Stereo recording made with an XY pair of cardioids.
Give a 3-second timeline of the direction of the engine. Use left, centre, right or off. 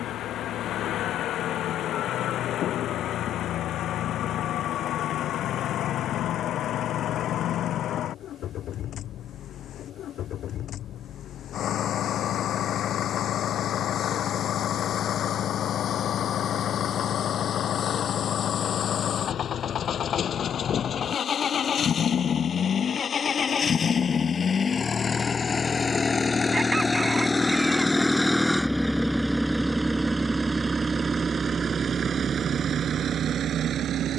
left, left, left, left, left, left, left, left, left, centre, right, right.